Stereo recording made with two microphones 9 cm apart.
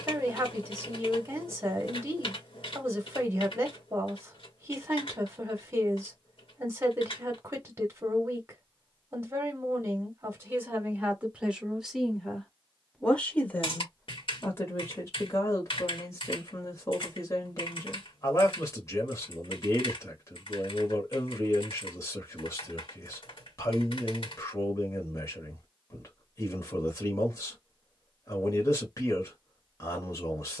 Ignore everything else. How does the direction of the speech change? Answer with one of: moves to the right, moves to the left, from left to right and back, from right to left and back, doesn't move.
moves to the left.